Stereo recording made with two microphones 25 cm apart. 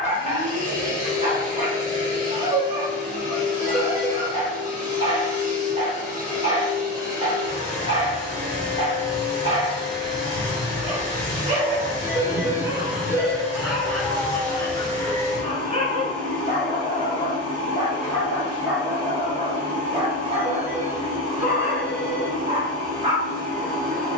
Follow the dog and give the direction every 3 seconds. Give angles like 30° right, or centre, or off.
30° right, 30° right, 30° right, 30° right, centre, 30° left, 20° right, 30° right.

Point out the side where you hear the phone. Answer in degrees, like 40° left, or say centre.
40° left.